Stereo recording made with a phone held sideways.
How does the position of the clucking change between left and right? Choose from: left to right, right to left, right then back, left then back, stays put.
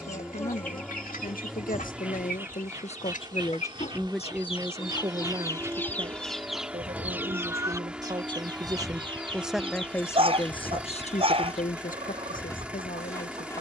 left to right.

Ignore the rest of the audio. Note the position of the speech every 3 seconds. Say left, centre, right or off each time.
left, centre, right, left, left.